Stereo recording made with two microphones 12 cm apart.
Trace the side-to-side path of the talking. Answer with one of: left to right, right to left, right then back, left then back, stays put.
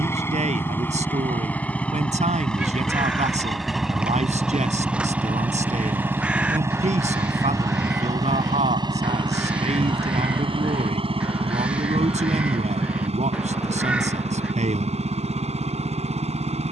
stays put.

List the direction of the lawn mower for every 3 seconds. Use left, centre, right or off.
centre, centre, right, right, right, right.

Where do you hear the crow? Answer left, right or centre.
centre.